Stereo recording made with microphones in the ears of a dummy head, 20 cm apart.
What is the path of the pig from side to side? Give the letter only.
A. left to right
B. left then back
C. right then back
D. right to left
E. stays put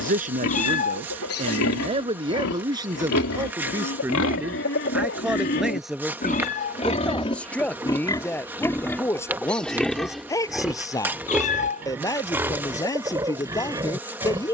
A.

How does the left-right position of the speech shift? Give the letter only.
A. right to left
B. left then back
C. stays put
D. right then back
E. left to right
A.